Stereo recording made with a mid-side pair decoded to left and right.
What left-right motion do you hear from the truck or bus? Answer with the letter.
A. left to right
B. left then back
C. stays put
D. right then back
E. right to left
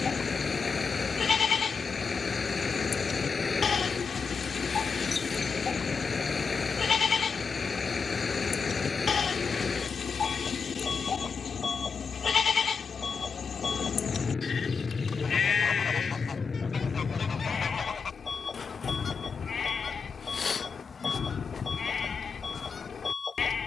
C.